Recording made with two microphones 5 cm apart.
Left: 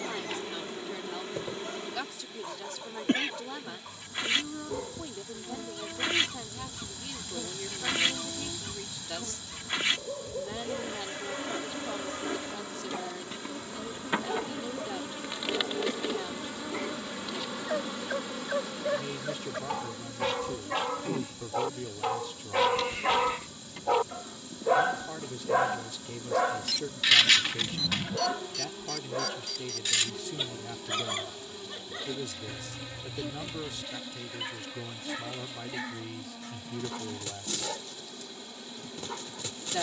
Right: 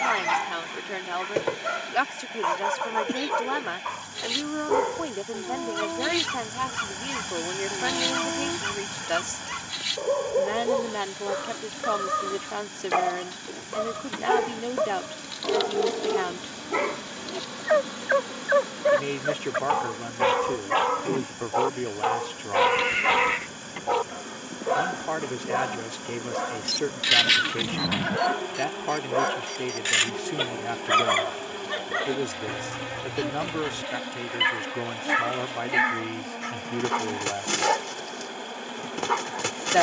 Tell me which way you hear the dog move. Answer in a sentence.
You can hear the dog move from right to left and back again.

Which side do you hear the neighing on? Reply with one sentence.
In this clip you hear the neighing on the right.